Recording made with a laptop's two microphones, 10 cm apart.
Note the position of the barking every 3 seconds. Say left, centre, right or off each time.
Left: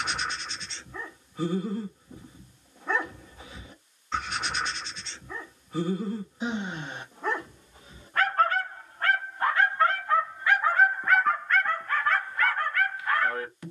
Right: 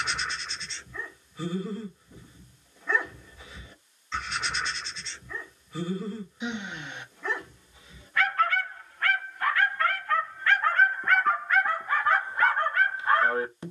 left, left, left, centre, right.